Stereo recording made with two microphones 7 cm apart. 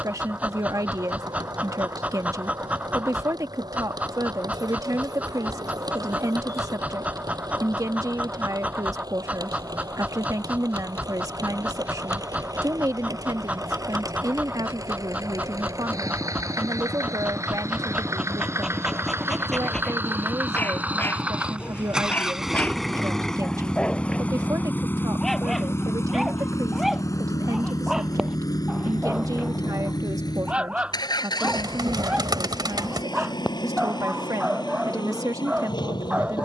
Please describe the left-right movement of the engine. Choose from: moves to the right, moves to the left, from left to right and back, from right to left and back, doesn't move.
moves to the left.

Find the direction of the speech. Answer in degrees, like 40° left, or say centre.
50° right.